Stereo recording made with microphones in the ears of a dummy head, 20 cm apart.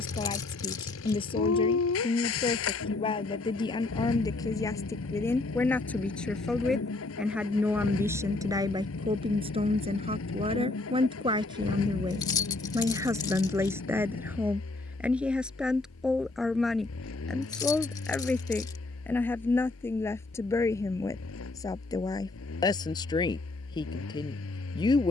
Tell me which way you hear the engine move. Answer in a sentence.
You can hear the engine stay in one place.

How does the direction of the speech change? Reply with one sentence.
You can hear the speech move from left to right and back again.